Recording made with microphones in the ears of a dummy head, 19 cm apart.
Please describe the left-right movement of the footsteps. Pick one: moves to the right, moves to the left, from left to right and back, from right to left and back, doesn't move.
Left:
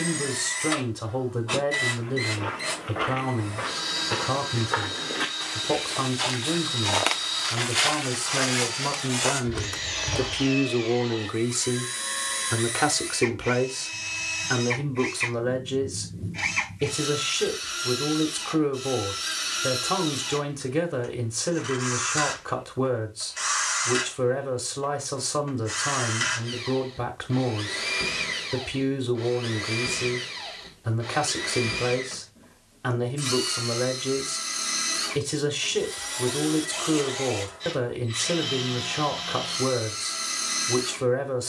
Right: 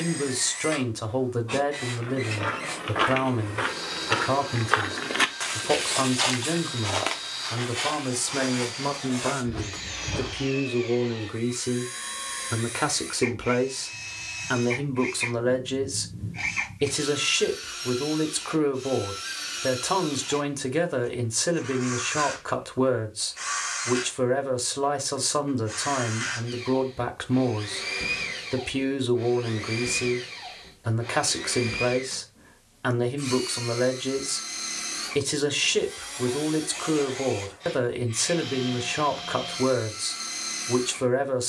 moves to the left.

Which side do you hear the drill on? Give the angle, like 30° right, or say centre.
40° left.